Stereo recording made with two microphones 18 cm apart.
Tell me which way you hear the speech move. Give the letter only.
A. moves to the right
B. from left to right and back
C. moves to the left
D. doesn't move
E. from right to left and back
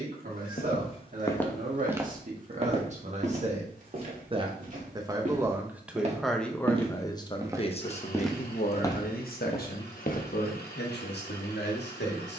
C.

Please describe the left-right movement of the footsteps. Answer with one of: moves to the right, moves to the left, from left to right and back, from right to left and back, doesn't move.
from left to right and back.